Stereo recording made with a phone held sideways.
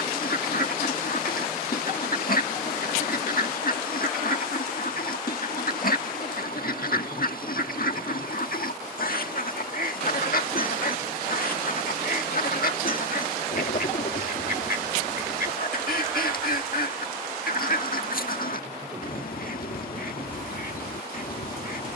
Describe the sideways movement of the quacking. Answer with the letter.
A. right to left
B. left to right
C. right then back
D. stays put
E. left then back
D.